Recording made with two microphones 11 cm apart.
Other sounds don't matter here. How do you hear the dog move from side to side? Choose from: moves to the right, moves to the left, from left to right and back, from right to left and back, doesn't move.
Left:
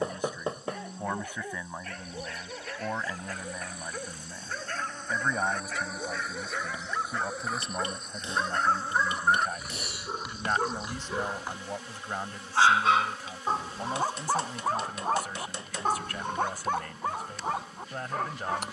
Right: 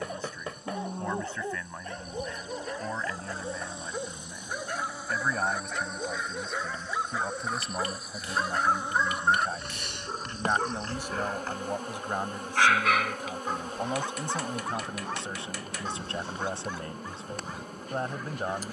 moves to the left.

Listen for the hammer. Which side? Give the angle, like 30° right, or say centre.
30° left.